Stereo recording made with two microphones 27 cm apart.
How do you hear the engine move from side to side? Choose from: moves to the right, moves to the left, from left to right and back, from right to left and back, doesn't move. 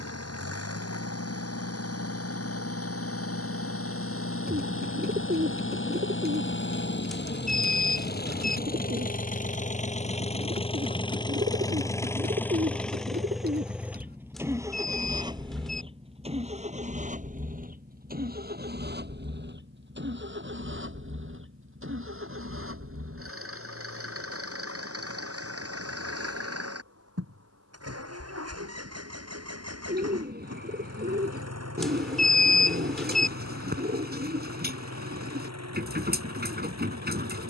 moves to the right.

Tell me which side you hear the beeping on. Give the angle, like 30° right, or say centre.
centre.